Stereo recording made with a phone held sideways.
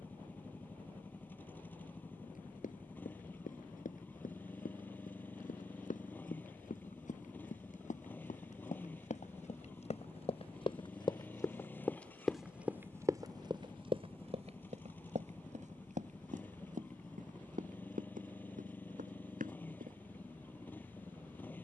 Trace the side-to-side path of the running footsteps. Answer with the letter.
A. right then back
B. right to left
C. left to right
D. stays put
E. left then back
C.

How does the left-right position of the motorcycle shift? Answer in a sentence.
In this clip you hear the motorcycle stay in one place.